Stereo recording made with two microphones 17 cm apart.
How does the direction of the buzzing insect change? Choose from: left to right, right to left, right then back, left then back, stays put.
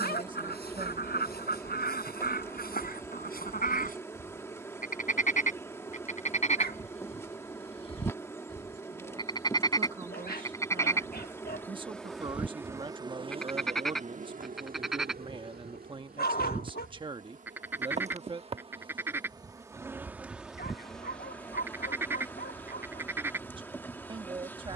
right then back.